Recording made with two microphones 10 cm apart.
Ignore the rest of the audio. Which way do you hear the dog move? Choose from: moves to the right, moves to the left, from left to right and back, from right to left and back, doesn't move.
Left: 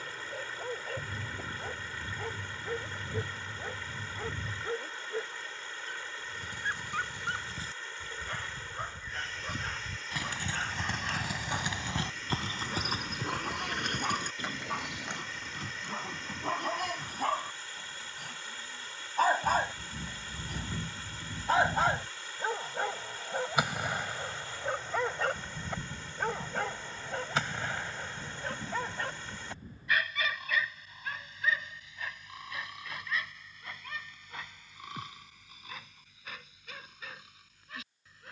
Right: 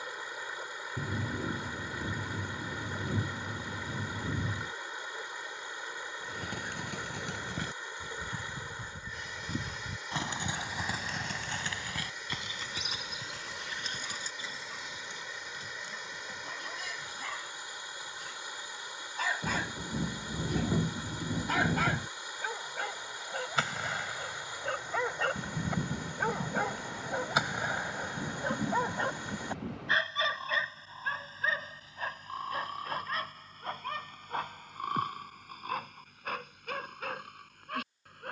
moves to the right.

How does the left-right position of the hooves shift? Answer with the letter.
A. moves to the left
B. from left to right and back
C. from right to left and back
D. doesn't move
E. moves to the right
A.